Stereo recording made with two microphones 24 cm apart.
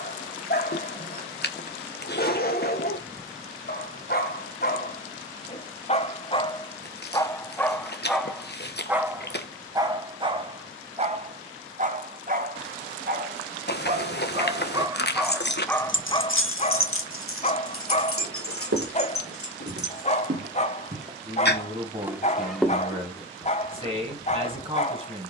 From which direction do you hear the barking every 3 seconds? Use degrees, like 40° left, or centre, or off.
40° left, 40° left, 10° left, 20° right, 30° right, 20° left, 30° left, 30° left, 30° left.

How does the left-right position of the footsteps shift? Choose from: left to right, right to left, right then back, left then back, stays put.
right to left.